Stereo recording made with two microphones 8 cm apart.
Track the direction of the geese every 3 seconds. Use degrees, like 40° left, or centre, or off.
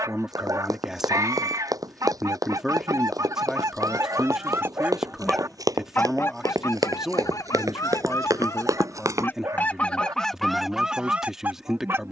50° right, 40° right, 50° left, centre.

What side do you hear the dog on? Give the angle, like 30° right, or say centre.
40° right.